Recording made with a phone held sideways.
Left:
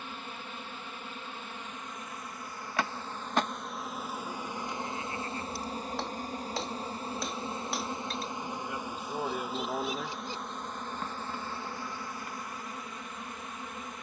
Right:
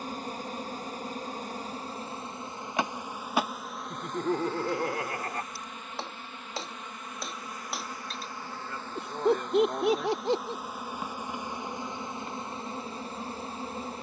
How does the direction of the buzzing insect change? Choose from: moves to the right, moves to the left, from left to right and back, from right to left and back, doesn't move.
from right to left and back.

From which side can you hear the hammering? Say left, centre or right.
centre.